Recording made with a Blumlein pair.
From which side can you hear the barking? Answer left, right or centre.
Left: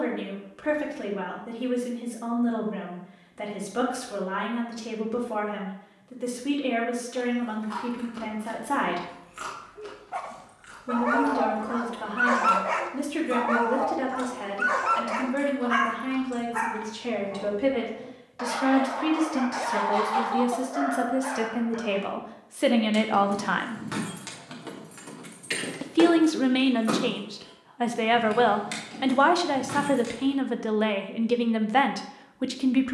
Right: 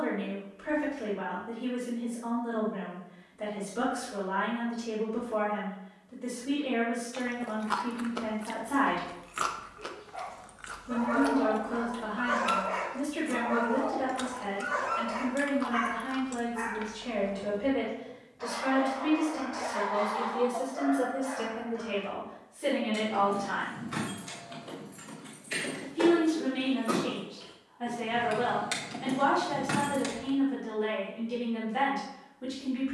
left.